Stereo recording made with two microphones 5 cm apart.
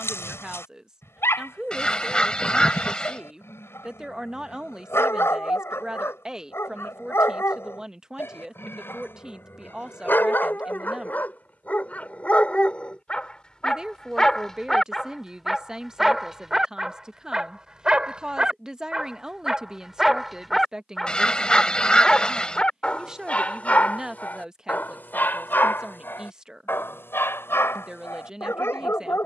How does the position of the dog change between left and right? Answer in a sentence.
You can hear the dog move from left to right and back again.